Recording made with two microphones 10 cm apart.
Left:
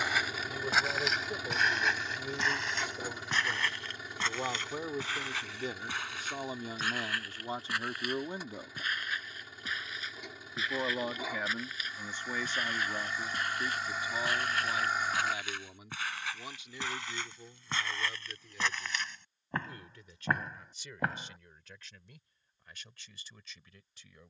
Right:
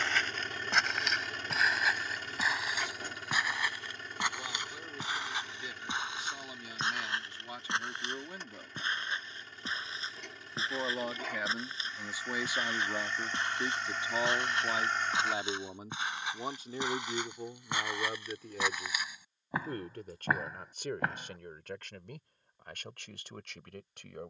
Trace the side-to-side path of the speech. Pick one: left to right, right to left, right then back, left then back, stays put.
left to right.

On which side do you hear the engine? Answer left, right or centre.
centre.